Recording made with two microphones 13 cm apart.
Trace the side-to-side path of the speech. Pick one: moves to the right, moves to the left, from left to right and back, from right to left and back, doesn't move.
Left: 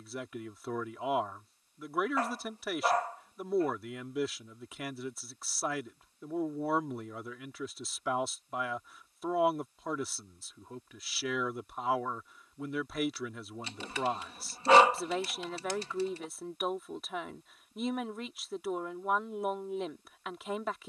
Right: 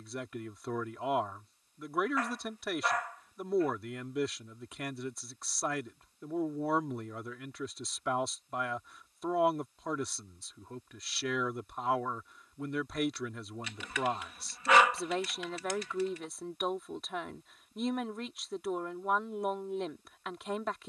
doesn't move.